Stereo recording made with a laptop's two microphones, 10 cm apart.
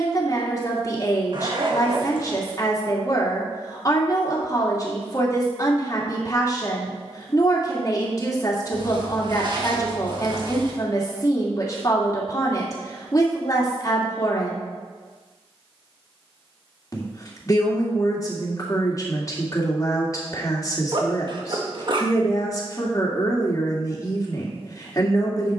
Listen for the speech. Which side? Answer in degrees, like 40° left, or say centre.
30° left.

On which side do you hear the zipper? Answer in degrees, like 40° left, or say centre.
50° right.